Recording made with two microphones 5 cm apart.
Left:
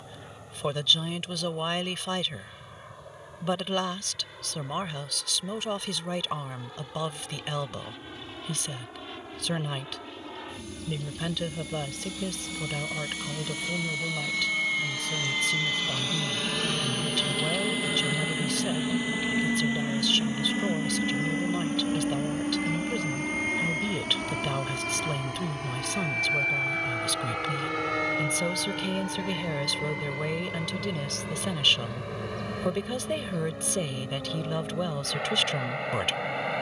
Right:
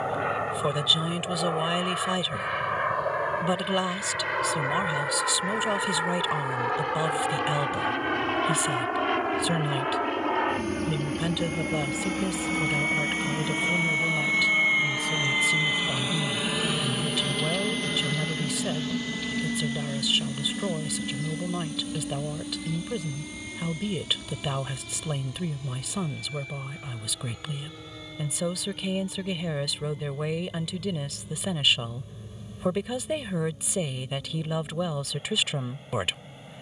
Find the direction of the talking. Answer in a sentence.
In this clip you hear the talking in the centre.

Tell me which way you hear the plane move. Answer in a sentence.
You can hear the plane travel towards the left.